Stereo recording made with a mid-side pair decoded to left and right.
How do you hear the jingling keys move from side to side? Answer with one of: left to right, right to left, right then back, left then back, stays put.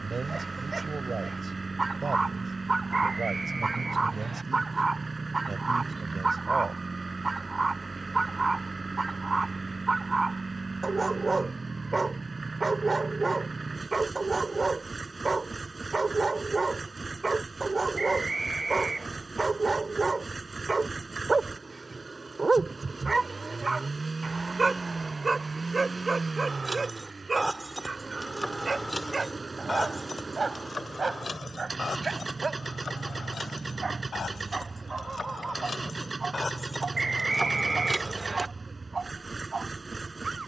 left then back.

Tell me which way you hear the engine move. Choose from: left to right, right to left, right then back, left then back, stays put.
stays put.